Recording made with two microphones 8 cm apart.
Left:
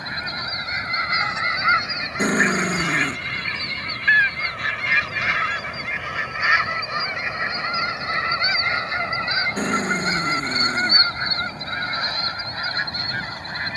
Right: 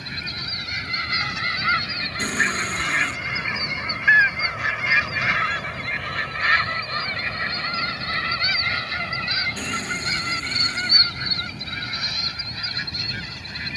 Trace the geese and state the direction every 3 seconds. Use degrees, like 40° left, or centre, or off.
20° left, centre, 20° left, 30° left, 40° left.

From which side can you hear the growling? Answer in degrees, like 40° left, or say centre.
40° left.